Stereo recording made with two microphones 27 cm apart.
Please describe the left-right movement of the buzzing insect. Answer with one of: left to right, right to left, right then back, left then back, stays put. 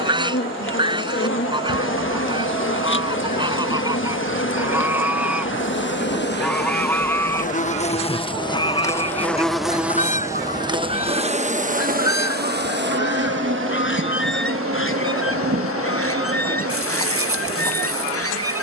left to right.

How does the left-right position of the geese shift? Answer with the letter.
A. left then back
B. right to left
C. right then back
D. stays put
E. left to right
B.